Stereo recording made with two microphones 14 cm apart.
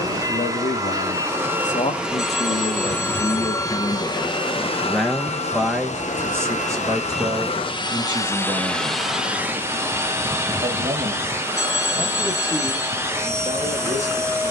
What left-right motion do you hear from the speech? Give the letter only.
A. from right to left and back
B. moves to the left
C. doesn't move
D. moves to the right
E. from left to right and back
D.